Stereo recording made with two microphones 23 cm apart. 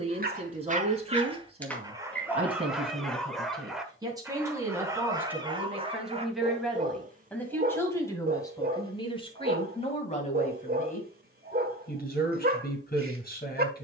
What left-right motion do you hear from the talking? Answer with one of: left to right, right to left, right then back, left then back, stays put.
right to left.